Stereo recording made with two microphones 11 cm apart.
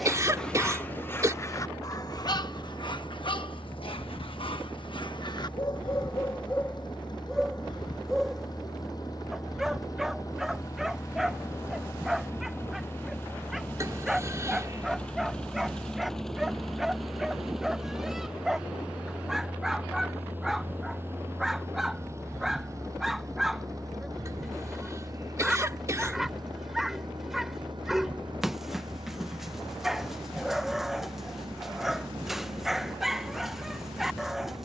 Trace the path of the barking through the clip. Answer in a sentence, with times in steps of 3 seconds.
You can hear the barking on the left from 0 s and in the centre from 6 s.